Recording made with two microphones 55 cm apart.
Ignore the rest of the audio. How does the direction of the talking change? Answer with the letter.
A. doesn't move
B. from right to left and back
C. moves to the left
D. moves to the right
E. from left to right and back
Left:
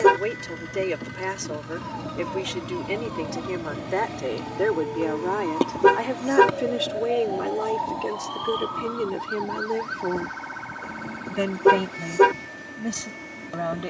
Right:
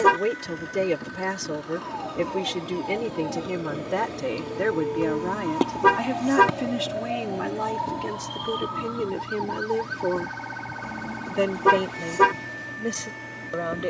C.